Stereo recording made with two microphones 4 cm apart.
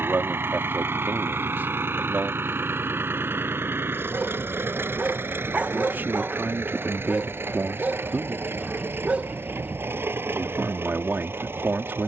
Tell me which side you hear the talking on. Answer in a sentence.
In this clip you hear the talking on the right.